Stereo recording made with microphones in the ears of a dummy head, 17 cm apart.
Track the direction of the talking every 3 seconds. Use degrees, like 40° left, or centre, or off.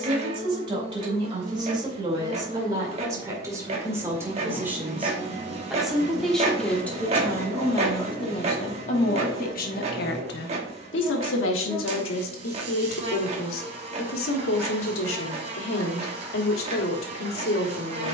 20° right, 10° right, 20° left, 60° left, 80° left, 80° left.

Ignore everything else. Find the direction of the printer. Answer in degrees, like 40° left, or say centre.
30° right.